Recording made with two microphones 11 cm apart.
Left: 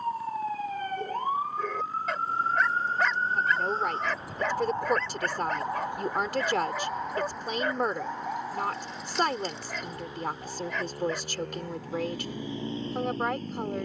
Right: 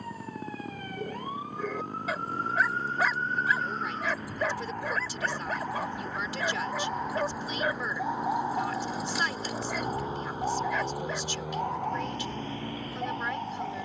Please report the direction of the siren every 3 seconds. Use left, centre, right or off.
left, left, centre, right, right.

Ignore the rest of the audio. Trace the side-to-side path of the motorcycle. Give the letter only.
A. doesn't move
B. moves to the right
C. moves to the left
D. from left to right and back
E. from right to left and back
C.